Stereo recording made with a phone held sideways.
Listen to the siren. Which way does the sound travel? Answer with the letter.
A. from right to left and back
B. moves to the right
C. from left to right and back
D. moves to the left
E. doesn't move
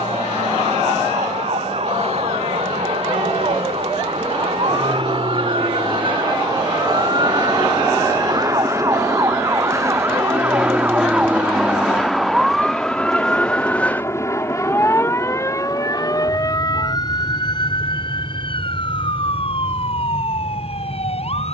D.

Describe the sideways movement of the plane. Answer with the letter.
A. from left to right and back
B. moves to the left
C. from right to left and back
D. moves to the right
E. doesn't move
B.